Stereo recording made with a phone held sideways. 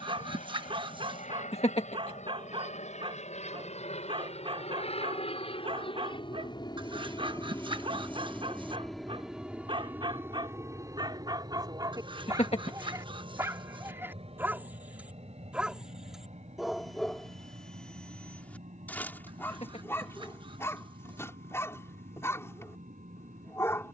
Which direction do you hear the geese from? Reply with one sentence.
In this clip you hear the geese on the right.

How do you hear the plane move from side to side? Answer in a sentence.
You can hear the plane move from left to right.